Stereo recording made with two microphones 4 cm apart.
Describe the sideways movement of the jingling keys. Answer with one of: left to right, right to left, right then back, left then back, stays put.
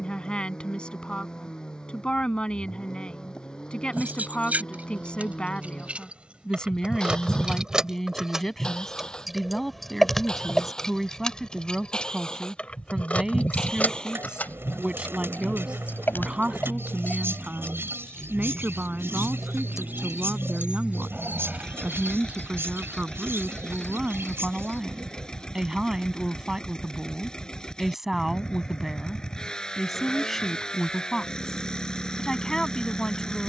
left then back.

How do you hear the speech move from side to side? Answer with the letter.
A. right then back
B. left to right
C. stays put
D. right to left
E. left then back
A.